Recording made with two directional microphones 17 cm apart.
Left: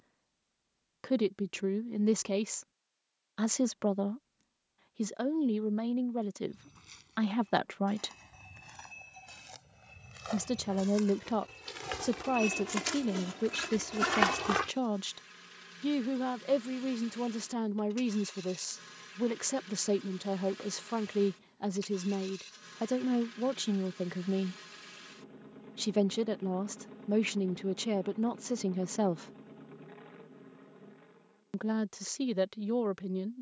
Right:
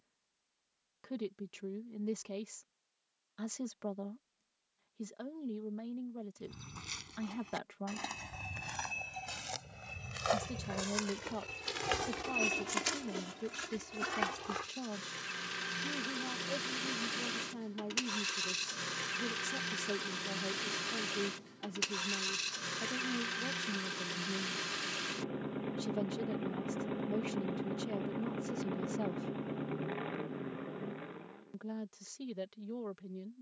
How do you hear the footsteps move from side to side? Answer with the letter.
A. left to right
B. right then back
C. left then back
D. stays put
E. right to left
E.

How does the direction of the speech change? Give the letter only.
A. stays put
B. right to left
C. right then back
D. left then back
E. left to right
A.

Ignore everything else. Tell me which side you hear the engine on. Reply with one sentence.
In this clip you hear the engine on the right.